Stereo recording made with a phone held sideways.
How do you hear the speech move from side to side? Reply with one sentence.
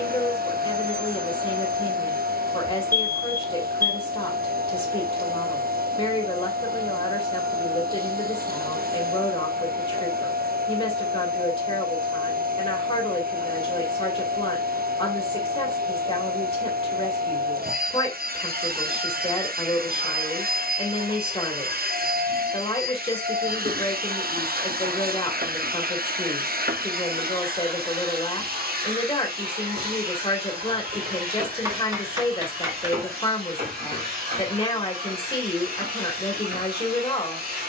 In this clip you hear the speech stay put.